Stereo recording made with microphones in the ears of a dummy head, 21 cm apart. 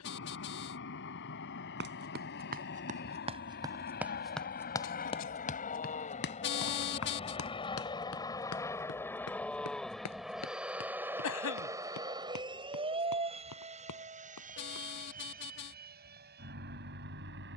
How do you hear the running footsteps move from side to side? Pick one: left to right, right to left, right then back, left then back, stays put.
right to left.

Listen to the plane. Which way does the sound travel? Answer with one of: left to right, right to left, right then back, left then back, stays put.
left to right.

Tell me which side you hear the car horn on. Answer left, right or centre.
left.